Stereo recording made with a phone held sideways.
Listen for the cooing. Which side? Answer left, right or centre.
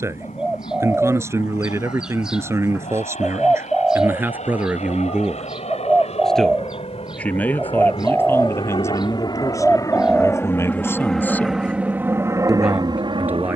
centre.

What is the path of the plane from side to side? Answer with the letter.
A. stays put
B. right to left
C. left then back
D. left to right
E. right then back
D.